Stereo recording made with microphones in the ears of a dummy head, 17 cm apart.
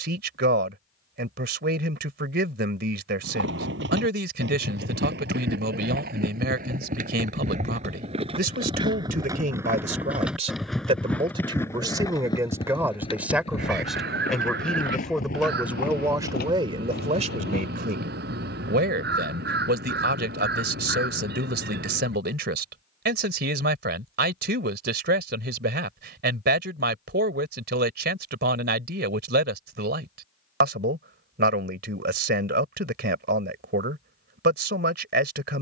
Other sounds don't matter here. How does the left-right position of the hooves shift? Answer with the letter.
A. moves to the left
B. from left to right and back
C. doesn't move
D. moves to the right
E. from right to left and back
A.